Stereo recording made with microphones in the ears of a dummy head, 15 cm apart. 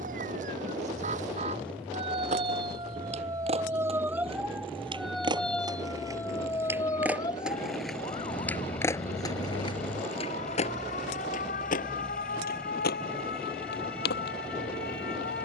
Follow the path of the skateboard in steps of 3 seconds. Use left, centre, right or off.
right, right, centre, left, left.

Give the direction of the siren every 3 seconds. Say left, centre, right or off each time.
right, centre, left, left, left.